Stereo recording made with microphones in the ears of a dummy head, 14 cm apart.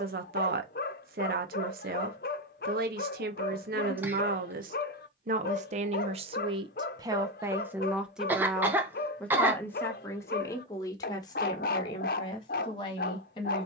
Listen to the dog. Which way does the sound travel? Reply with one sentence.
In this clip you hear the dog stay put.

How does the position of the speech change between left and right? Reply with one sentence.
You can hear the speech move from right to left.